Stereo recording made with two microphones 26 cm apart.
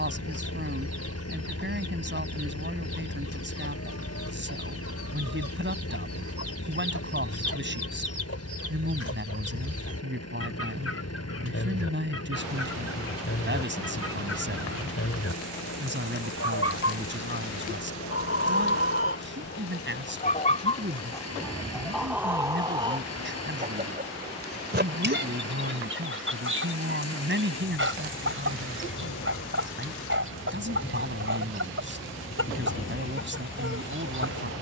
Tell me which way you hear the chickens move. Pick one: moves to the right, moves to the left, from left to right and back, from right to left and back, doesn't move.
moves to the right.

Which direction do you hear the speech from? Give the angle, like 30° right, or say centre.
40° right.